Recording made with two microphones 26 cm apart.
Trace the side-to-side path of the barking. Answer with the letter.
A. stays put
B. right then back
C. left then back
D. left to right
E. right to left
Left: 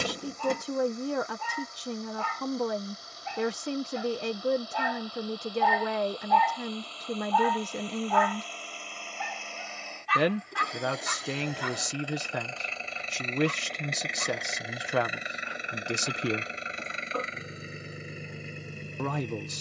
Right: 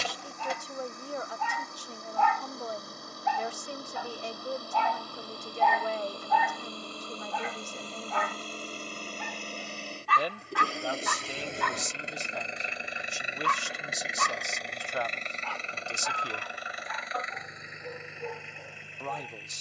D.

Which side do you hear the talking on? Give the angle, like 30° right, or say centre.
70° left.